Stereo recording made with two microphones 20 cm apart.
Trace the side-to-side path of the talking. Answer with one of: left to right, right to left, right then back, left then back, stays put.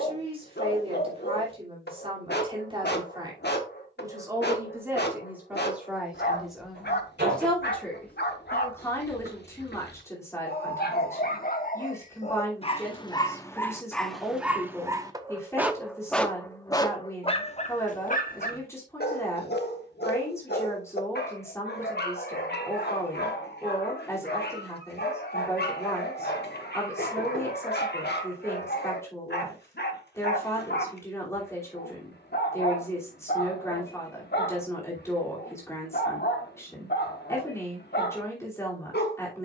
right to left.